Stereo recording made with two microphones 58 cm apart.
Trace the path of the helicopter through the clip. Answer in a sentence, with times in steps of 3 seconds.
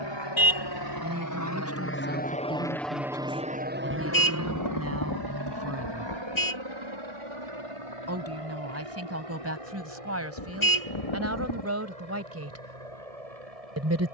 You can hear the helicopter on the left from 0 s and on the right from 3 s.